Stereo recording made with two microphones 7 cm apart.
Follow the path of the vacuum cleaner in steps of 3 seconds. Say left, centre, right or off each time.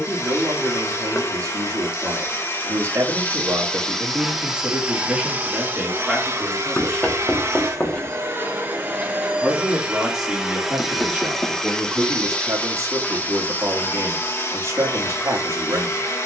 left, centre, right, centre, left, left.